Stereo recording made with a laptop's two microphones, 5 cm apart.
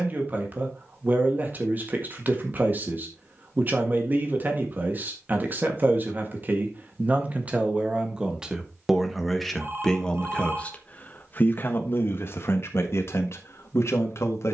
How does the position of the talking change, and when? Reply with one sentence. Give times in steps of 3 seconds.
You can hear the talking on the right from 0 s and on the left from 9 s.